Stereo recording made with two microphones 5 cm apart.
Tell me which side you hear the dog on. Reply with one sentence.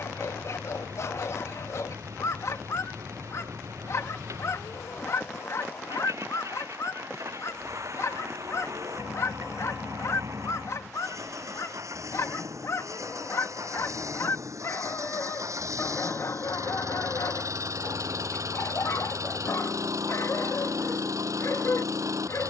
In this clip you hear the dog on the left.